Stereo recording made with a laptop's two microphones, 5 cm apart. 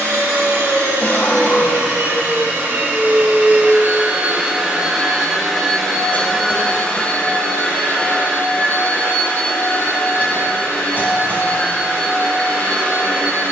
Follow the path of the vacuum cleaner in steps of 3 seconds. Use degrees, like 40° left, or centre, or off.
60° right, 20° right, 30° left, 50° left, 60° left.